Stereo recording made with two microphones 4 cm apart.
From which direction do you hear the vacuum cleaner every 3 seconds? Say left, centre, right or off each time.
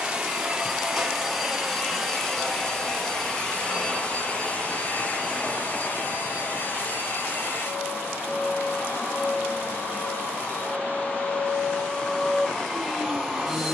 centre, left, left, left, centre.